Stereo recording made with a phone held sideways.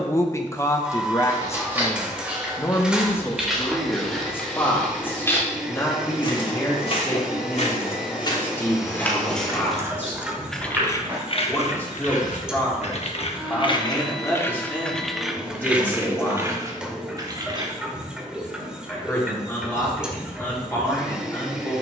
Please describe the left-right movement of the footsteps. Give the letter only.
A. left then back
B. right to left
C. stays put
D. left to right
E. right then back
A.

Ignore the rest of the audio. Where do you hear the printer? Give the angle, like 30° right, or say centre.
10° right.